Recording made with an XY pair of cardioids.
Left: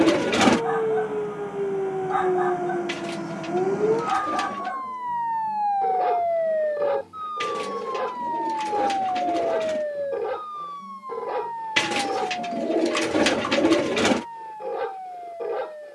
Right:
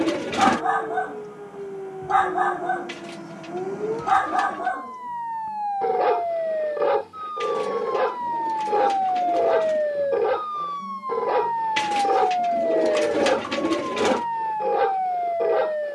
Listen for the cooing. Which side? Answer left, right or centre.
left.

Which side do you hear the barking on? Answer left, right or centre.
right.